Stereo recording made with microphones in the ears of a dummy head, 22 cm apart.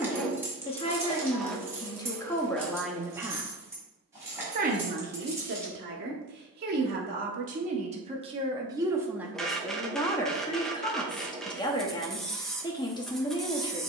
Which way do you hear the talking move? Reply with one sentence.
You can hear the talking move from left to right and back again.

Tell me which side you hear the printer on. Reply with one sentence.
You can hear the printer in the centre.